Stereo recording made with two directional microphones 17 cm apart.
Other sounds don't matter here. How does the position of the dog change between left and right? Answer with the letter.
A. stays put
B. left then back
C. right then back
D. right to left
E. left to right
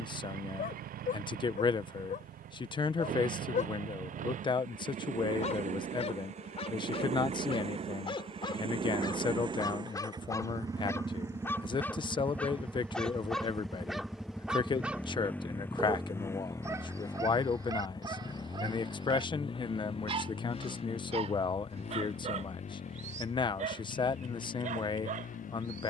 E.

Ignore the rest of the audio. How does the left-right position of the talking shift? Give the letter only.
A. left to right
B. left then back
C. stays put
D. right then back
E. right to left
C.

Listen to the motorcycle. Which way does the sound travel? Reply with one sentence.
In this clip you hear the motorcycle travel towards the left.